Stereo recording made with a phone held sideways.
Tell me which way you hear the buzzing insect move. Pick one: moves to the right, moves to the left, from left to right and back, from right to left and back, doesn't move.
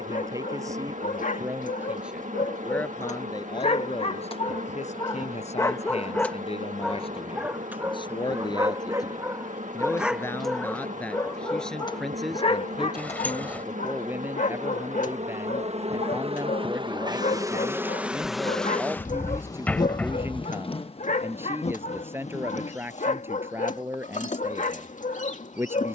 moves to the left.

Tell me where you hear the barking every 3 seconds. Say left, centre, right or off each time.
left, left, centre, centre, left, left, left, left, left.